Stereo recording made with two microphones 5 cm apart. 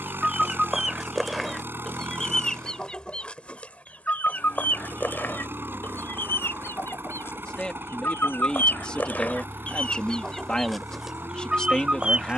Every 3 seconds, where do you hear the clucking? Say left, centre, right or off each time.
centre, left, left, centre.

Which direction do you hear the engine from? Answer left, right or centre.
right.